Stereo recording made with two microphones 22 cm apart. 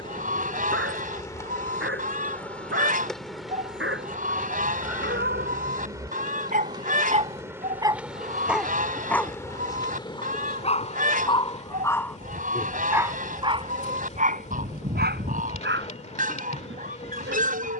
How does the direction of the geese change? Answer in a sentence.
You can hear the geese stay put.